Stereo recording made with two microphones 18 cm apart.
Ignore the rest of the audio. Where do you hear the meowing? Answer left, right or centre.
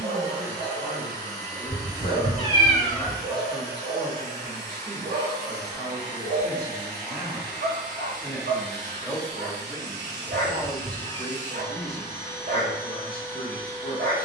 left.